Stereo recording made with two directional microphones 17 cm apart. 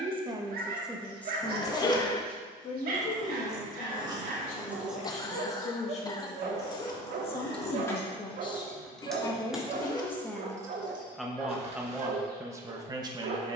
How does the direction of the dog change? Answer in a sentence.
You can hear the dog stay in one place.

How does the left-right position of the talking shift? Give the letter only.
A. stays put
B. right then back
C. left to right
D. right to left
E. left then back
E.